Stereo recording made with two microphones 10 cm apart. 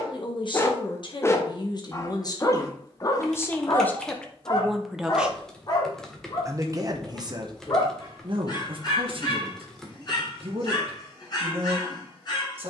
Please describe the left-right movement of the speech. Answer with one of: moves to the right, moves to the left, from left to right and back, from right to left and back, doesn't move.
moves to the right.